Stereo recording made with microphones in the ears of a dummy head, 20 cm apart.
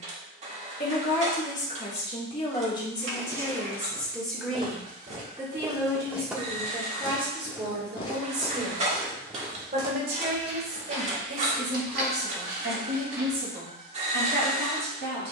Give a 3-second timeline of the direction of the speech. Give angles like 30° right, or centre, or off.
30° left, centre, 20° right, 40° right, 50° right.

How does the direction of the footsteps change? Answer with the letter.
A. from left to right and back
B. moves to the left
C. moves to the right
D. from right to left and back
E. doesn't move
D.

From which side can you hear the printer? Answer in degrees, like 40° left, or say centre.
30° right.